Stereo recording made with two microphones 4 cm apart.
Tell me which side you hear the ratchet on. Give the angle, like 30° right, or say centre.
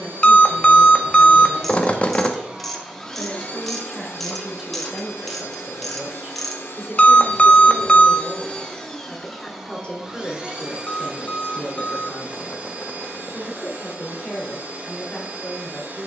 10° left.